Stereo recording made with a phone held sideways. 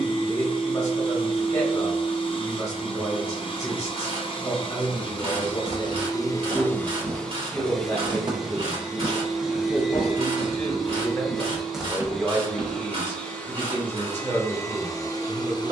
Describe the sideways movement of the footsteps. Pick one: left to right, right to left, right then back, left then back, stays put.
left then back.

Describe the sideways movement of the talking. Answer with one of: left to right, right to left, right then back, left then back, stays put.
left to right.